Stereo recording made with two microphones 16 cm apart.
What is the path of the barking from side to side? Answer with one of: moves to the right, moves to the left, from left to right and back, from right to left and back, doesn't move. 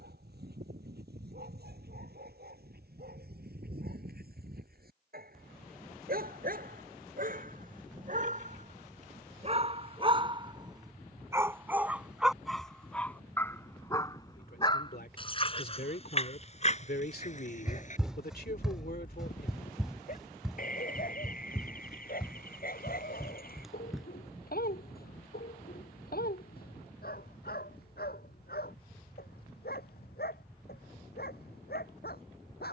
moves to the left.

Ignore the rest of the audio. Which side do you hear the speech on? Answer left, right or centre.
left.